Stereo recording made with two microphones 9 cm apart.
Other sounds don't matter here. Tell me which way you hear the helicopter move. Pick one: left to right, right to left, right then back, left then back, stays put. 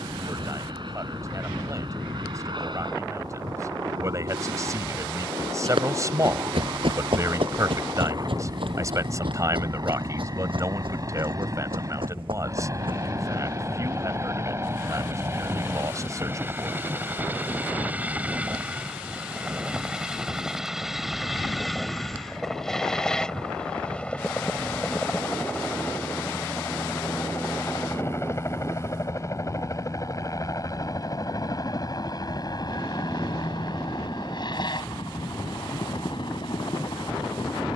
right to left.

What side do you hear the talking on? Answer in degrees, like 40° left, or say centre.
30° right.